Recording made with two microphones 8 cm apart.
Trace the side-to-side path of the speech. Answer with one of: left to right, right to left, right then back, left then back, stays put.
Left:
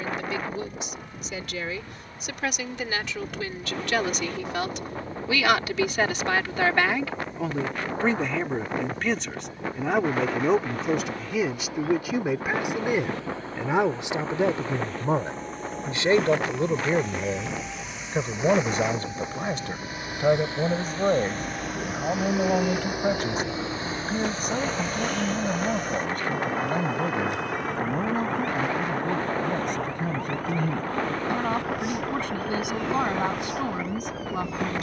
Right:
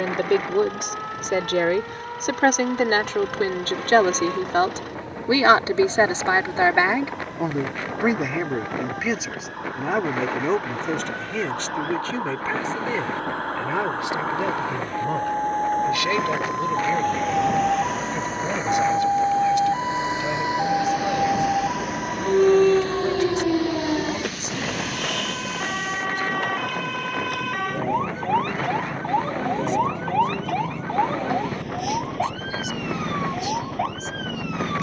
right to left.